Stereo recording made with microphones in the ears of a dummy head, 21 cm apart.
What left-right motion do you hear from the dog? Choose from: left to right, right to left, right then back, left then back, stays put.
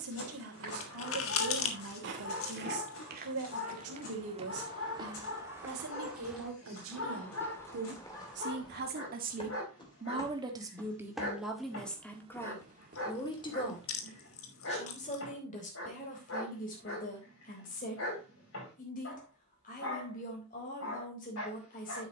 stays put.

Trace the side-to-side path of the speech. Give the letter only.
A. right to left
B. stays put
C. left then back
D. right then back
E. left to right
A.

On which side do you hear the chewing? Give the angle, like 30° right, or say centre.
70° left.